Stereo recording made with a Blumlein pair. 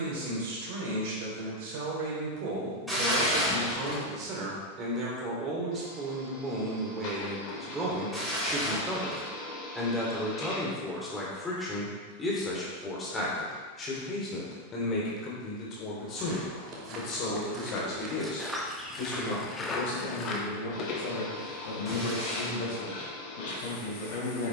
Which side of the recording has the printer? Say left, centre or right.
left.